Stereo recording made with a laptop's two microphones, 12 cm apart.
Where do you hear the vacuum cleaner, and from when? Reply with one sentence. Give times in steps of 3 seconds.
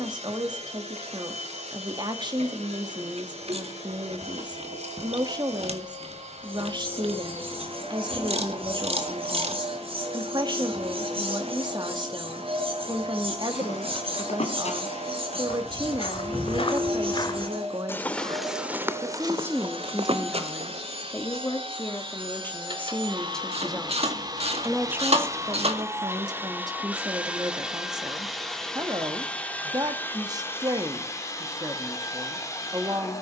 In this clip you hear the vacuum cleaner on the right from 0 s, in the centre from 27 s and on the left from 30 s.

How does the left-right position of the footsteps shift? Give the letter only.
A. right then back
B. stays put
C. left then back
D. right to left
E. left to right
E.